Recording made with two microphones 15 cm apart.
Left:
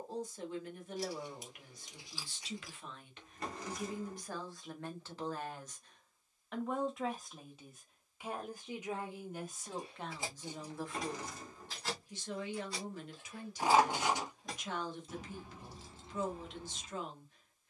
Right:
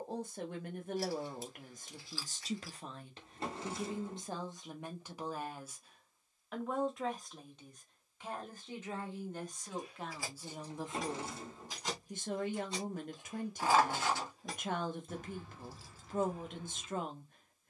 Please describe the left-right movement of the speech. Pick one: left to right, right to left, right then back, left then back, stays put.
left then back.